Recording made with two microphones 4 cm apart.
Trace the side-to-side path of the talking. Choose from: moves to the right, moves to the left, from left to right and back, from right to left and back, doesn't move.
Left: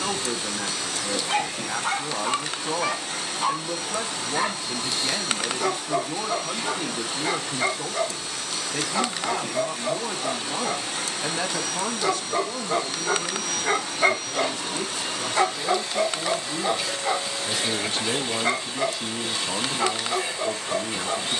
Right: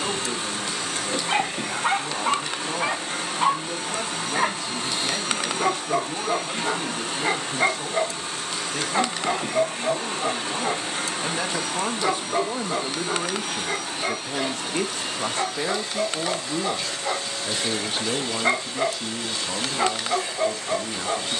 from left to right and back.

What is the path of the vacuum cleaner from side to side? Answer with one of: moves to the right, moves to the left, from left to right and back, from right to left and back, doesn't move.
moves to the left.